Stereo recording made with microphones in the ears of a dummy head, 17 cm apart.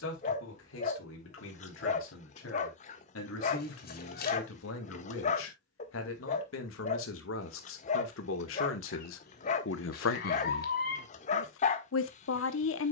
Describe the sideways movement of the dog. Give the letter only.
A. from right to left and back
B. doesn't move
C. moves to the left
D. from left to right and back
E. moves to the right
B.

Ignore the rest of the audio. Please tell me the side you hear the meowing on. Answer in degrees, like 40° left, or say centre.
50° left.